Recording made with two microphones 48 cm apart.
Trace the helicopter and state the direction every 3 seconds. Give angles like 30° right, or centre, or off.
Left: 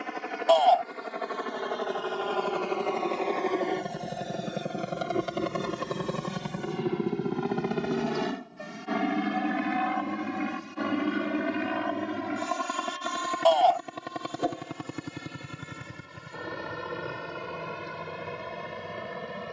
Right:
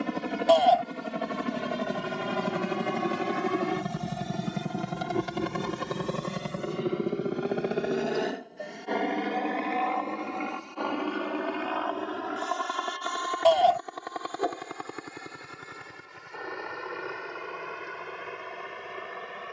50° right, 20° right, 10° left, 40° left, 50° left, 50° left, 60° left.